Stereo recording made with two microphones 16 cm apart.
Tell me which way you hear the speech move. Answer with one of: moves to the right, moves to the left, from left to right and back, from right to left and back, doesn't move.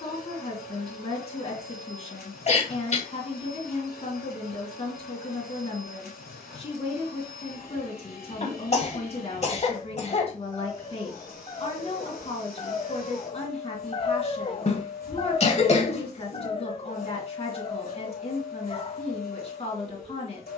doesn't move.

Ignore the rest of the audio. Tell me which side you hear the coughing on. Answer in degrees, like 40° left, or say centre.
40° left.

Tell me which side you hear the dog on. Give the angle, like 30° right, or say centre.
30° left.